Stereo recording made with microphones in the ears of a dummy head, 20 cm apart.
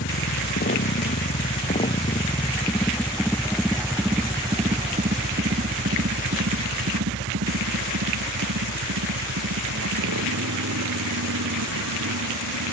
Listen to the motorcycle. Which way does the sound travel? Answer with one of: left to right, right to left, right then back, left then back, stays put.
left to right.